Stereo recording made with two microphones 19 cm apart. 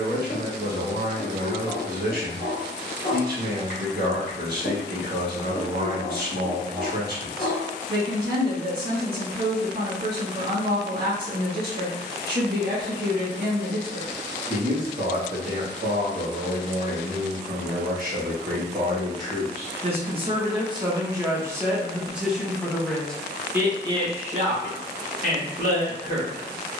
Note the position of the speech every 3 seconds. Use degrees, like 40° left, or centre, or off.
50° right, 50° right, 50° right, 50° right, 50° right, 50° right, 30° right, 10° right, 50° right.